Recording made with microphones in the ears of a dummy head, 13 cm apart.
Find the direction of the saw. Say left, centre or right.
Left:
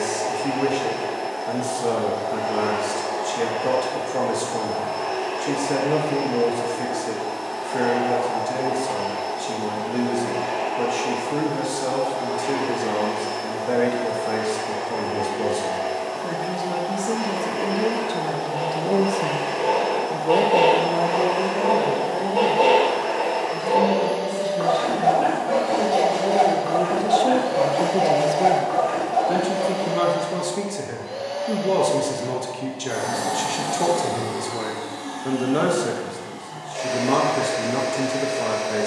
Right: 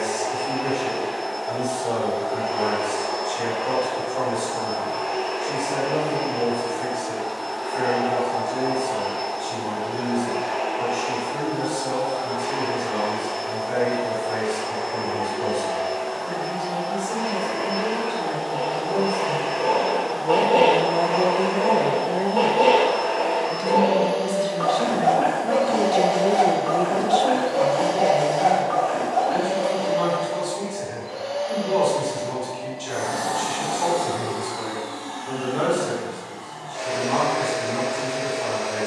centre.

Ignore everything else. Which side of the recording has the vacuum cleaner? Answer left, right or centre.
left.